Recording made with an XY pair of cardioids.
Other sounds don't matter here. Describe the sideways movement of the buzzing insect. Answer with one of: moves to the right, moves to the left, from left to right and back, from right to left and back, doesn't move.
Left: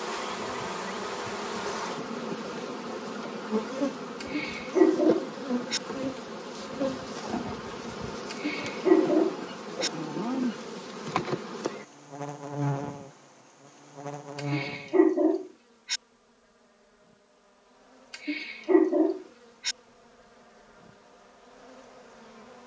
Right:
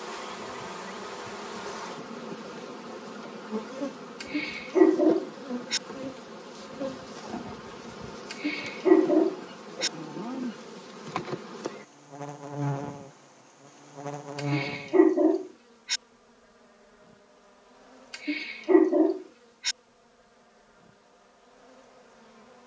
from left to right and back.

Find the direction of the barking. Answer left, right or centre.
centre.